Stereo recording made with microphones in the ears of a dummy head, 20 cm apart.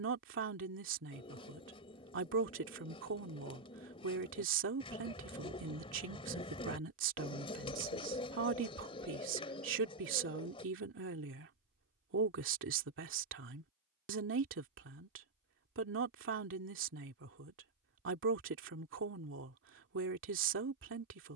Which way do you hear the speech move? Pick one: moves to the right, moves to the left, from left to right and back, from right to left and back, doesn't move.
doesn't move.